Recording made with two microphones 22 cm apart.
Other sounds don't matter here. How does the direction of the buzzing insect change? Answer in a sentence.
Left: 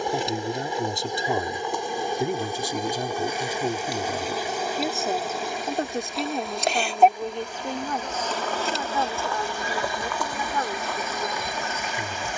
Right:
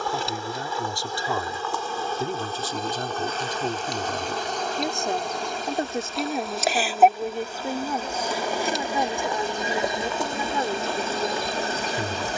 In this clip you hear the buzzing insect go from the left side to the right.